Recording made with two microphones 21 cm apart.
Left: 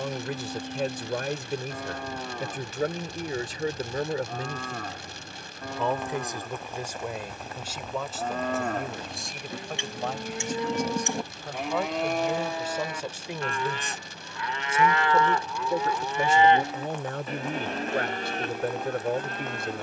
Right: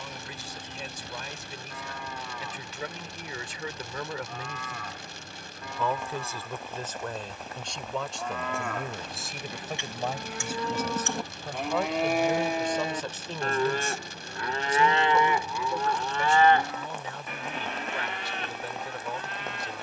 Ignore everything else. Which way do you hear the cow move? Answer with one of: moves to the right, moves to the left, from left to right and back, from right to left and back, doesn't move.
from left to right and back.